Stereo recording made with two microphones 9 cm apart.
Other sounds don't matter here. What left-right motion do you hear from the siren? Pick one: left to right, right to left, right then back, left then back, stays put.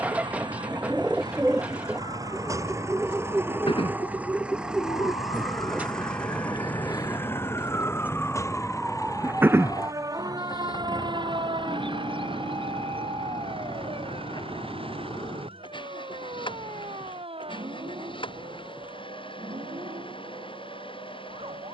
left to right.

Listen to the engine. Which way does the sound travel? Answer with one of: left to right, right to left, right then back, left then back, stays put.
right to left.